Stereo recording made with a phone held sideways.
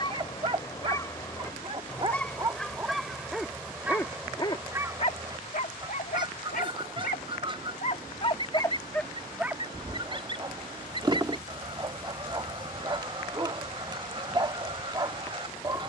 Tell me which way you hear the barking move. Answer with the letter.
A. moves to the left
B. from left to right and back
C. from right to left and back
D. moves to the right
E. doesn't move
C.